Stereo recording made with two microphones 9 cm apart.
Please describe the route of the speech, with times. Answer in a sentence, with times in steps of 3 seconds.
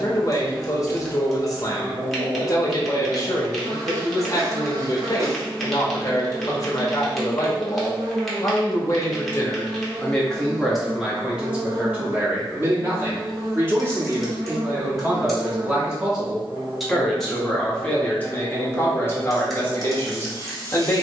In this clip you hear the speech on the left from 0 s, in the centre from 9 s, on the right from 12 s, in the centre from 15 s and on the left from 18 s.